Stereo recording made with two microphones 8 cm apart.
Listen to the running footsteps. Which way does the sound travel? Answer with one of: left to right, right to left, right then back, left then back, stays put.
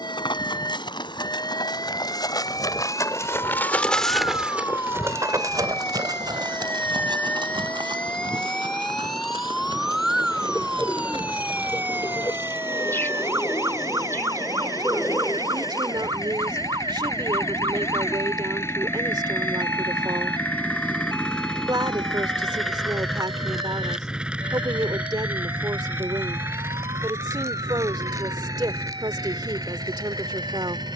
left to right.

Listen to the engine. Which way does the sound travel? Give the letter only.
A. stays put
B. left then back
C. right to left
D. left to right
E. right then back
D.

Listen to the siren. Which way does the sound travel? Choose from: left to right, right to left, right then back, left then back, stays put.
left to right.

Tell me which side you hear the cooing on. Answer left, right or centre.
left.